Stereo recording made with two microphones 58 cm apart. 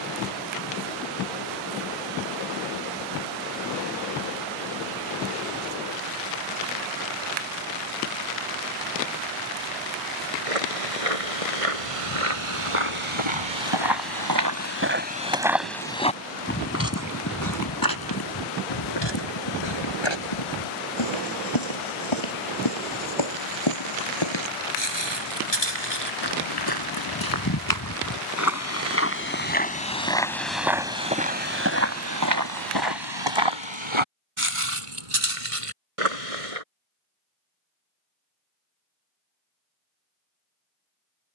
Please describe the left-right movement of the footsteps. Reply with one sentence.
You can hear the footsteps go left and come back.